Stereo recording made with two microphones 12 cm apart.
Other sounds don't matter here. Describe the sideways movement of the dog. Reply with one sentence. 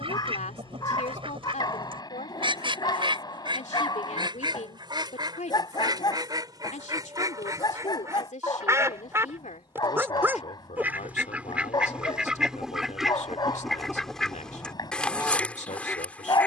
You can hear the dog stay put.